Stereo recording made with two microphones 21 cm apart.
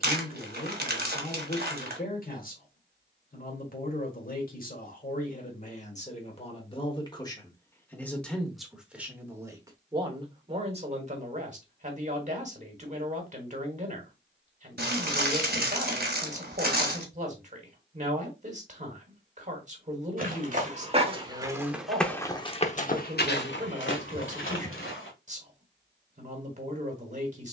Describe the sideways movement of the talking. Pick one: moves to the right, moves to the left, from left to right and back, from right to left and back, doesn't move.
moves to the right.